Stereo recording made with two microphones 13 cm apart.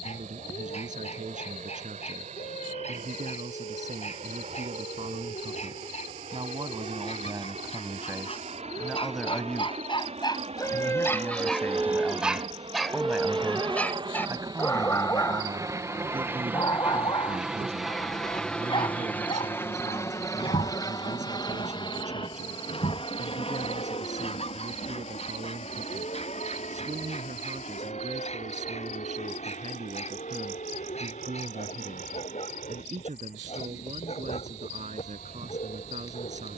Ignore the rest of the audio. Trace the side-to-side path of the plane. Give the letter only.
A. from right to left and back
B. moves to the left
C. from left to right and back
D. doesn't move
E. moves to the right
B.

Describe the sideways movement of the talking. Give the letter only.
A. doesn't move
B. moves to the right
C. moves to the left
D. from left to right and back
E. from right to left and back
E.